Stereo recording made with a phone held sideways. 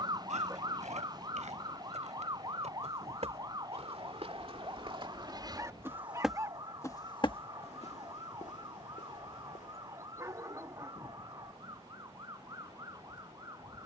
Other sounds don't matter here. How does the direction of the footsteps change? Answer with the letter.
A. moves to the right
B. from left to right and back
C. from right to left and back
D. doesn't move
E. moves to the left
E.